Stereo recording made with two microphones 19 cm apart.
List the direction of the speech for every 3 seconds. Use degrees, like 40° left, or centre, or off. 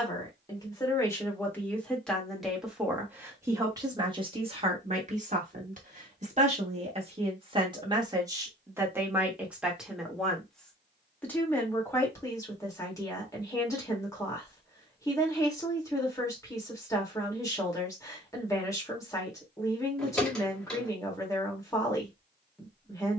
10° left, 30° right, 30° right, centre, 20° left, 20° left, 20° left, 20° left.